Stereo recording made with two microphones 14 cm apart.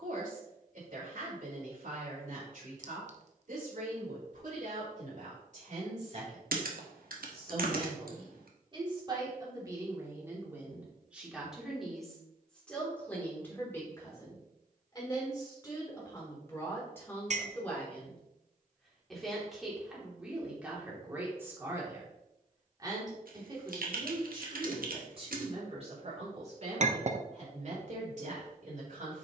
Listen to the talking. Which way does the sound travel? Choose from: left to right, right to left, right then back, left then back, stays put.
left then back.